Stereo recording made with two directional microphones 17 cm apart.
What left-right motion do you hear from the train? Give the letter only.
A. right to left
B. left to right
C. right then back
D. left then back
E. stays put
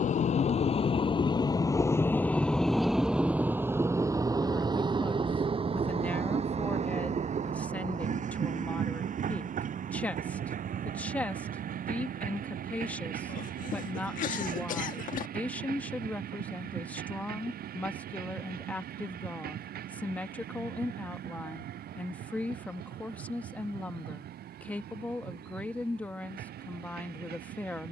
B.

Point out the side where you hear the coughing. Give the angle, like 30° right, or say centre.
50° left.